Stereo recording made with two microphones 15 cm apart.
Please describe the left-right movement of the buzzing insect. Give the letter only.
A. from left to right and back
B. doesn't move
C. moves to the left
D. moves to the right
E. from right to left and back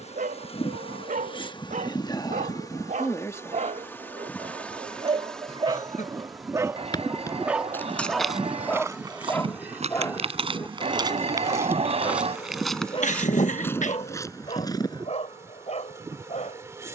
D.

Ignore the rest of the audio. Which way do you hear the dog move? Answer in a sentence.
You can hear the dog move from right to left.